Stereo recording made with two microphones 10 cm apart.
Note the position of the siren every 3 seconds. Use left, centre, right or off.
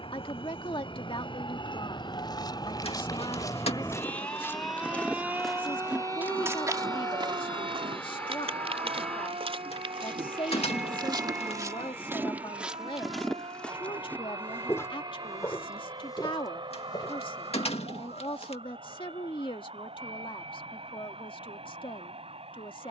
left, centre, right, right, right, right, right, right.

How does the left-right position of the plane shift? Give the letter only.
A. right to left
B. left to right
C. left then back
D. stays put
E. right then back
B.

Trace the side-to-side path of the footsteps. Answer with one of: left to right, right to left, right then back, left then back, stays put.
right then back.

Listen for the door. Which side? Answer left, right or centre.
left.